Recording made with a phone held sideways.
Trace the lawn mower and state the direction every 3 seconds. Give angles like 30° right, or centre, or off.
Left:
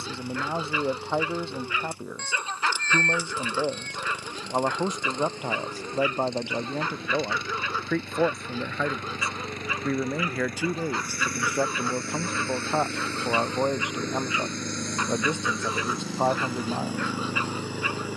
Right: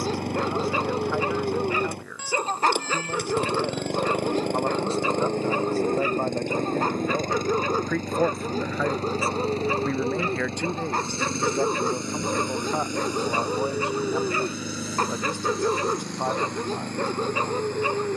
60° right, 60° right, 40° right, 30° right, 10° right, centre.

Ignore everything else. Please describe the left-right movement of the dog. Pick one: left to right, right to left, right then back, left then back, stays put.
stays put.